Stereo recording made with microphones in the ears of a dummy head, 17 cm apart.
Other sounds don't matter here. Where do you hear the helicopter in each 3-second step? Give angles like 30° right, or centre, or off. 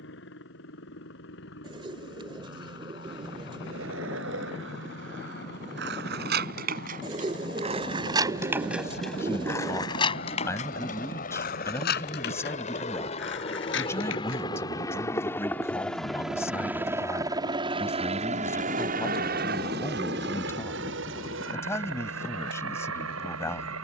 60° left, 60° left, 50° left, 50° left, 30° left, 10° right, 50° right, 70° right.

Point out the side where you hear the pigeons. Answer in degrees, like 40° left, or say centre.
30° right.